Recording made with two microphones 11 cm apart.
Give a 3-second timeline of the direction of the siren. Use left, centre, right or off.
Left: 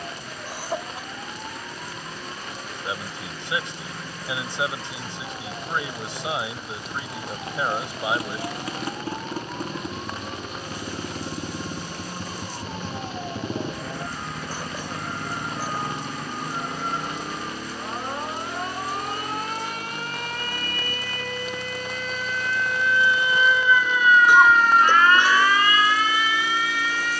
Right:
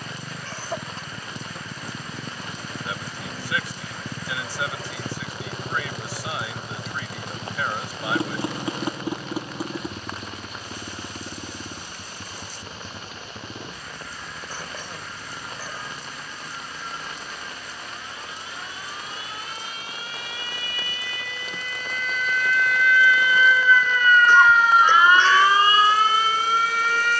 left, left, left, left, left, left, left, left, right.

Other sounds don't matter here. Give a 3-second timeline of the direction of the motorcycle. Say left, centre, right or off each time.
right, right, right, centre, left, left, left, left, left.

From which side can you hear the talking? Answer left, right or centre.
left.